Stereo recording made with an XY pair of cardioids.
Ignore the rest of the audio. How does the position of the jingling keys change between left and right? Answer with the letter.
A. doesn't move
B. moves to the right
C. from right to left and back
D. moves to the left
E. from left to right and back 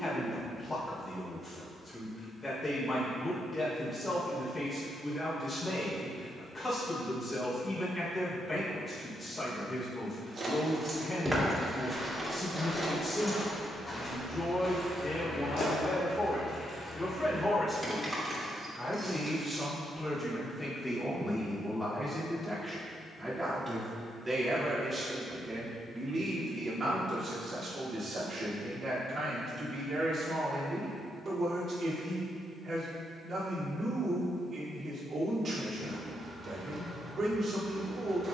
C.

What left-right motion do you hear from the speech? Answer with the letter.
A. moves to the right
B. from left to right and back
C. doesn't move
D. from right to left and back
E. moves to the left
A.